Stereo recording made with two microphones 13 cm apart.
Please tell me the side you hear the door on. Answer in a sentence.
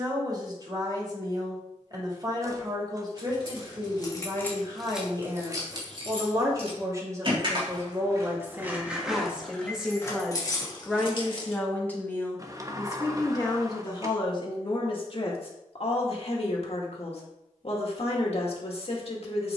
In this clip you hear the door on the right.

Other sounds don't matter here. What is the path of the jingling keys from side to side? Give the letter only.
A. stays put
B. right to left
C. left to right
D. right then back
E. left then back
D.